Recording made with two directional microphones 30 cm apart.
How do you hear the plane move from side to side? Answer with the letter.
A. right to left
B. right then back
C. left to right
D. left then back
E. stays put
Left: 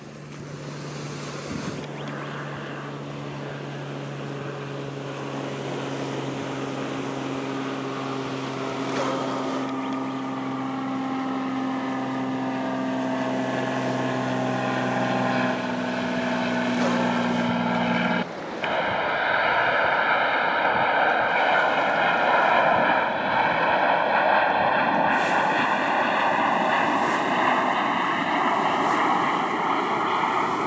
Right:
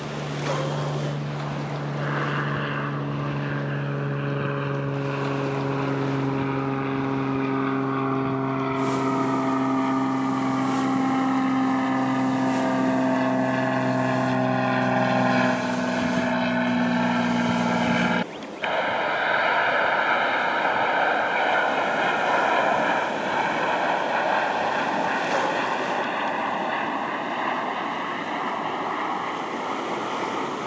A.